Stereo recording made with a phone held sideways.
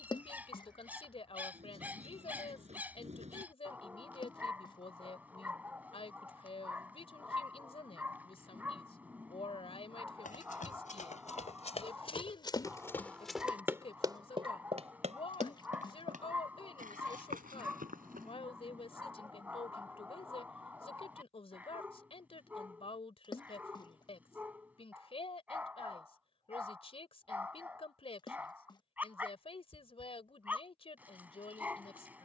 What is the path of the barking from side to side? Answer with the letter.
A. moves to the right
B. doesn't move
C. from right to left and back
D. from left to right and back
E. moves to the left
B.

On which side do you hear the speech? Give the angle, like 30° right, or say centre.
40° left.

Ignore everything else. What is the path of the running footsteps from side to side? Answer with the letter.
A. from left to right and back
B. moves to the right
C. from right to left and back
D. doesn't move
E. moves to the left
B.